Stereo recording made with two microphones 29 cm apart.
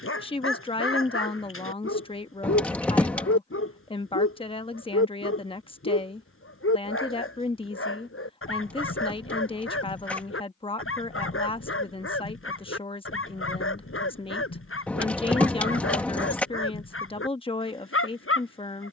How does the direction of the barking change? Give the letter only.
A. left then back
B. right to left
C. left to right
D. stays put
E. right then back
D.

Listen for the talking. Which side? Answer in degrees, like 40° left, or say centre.
20° left.